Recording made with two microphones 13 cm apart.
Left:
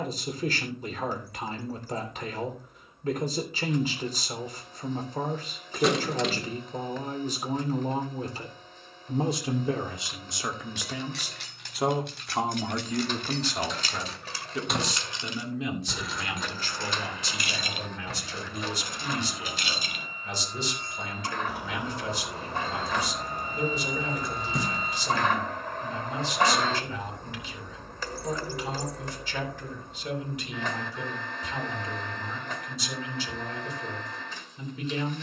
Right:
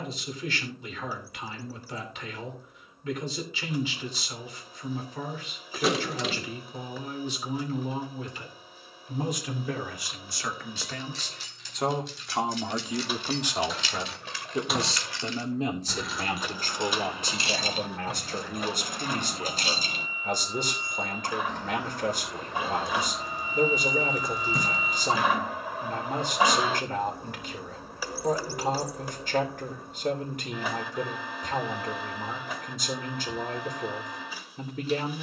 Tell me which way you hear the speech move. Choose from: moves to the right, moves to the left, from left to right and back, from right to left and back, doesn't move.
moves to the right.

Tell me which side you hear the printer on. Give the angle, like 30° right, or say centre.
10° right.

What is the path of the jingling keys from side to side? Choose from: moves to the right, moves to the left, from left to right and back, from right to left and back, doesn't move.
from left to right and back.